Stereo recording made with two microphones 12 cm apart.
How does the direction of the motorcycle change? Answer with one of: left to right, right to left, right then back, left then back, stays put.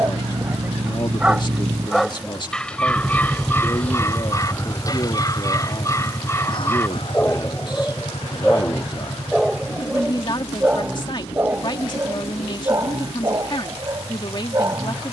right to left.